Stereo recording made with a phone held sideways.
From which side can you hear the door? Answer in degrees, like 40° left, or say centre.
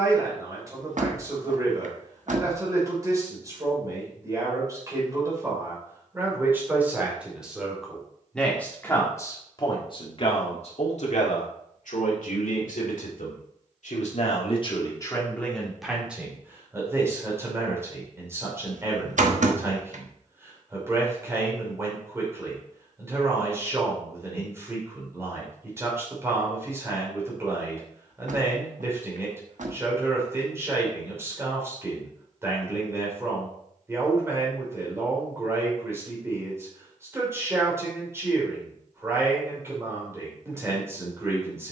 60° right.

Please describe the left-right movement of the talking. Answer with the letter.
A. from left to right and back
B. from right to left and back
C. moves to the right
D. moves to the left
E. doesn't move
B.